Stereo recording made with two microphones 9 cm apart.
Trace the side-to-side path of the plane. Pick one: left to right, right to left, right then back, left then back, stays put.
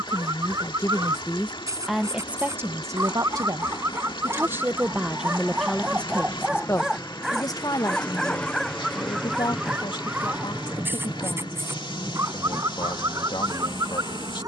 left to right.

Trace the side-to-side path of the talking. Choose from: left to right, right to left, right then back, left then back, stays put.
right then back.